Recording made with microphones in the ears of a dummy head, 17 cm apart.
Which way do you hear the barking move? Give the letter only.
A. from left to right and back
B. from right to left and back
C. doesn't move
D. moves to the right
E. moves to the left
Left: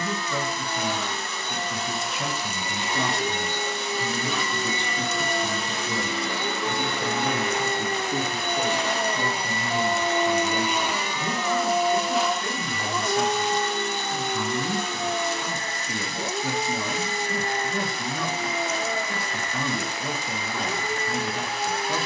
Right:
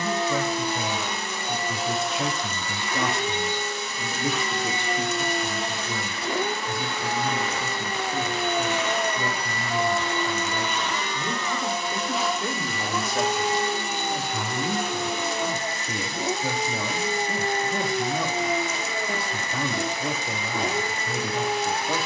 B.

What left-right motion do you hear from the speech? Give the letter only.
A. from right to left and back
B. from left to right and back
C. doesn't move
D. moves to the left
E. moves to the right
A.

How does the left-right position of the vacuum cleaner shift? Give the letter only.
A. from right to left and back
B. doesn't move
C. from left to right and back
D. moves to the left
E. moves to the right
A.